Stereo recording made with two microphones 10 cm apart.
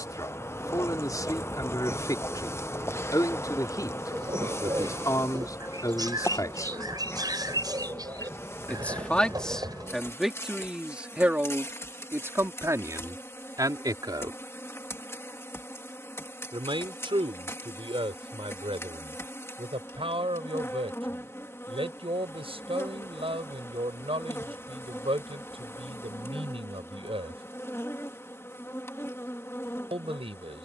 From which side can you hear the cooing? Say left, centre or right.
right.